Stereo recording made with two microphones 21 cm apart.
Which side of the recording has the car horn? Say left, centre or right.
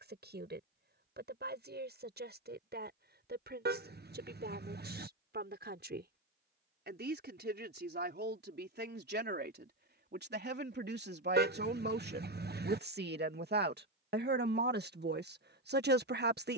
right.